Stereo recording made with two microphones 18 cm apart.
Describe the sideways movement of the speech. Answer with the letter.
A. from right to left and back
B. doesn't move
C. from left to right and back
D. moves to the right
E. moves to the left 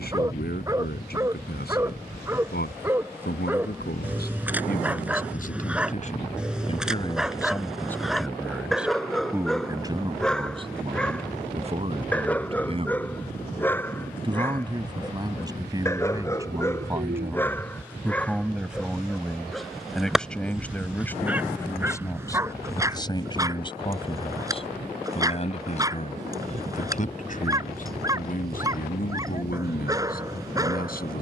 C.